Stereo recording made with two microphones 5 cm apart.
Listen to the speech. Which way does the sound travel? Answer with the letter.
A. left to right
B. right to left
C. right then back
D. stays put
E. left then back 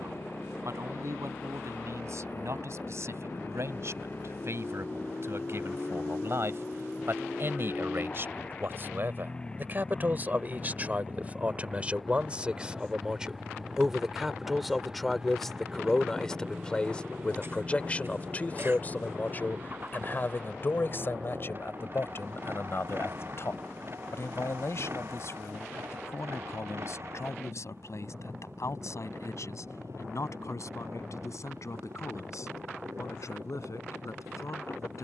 B.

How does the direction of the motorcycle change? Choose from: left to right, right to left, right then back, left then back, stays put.
left to right.